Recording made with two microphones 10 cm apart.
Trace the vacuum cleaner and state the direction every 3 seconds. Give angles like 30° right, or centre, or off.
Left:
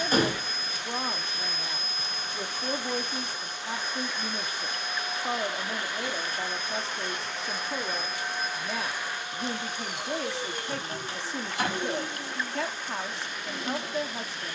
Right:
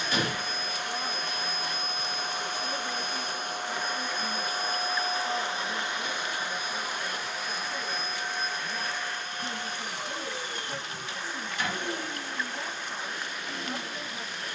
60° right, 40° right, centre, 10° left, 20° left.